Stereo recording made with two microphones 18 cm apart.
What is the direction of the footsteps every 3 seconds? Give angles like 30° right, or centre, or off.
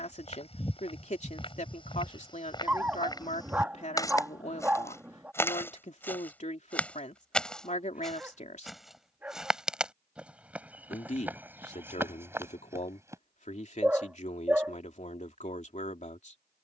30° left, 20° left, centre, 10° right, 10° right, off.